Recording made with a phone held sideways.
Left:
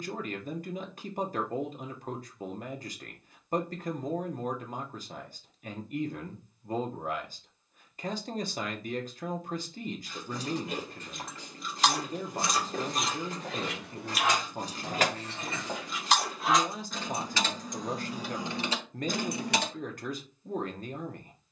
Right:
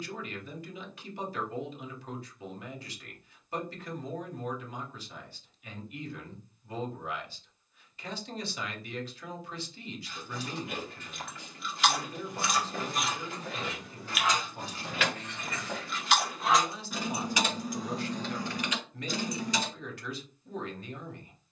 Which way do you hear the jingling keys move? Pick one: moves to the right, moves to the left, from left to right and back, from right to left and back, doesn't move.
from left to right and back.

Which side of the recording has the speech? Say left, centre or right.
left.